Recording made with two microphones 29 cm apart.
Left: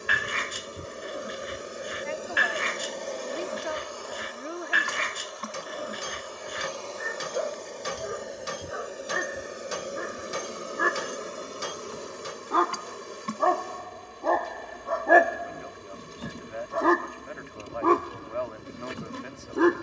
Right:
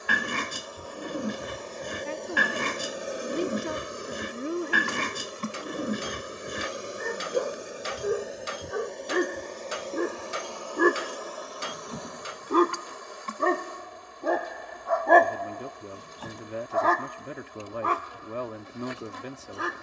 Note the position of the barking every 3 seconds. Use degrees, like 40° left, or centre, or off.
50° right, 50° right, 50° right, 50° right, 20° right, 30° left, 60° left.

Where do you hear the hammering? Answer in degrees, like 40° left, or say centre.
50° left.